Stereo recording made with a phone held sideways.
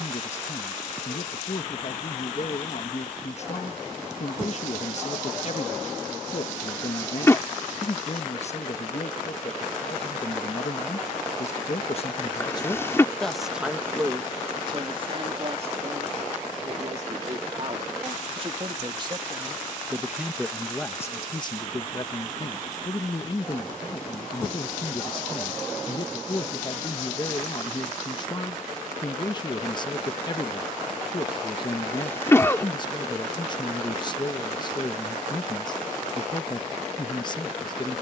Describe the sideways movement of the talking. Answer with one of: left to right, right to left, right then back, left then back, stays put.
right then back.